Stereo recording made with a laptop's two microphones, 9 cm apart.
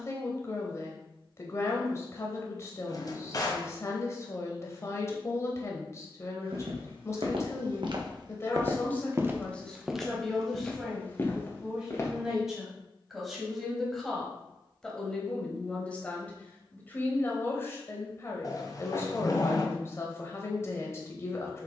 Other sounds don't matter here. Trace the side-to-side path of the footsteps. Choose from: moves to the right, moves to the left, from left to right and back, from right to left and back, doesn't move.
moves to the left.